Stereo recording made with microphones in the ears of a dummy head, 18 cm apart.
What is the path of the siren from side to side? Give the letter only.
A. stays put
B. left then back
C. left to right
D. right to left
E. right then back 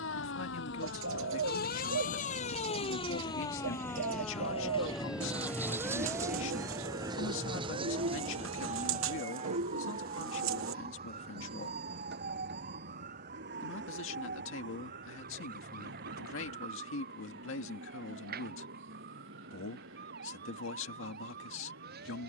C.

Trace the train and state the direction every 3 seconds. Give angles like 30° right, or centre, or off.
70° left, 30° left, 20° right, 50° right, 60° right, 60° right, 70° right, 70° right.